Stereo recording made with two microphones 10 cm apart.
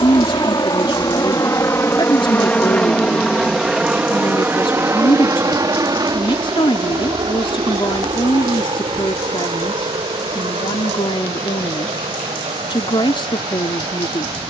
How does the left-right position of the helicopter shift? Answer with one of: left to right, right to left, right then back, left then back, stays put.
left to right.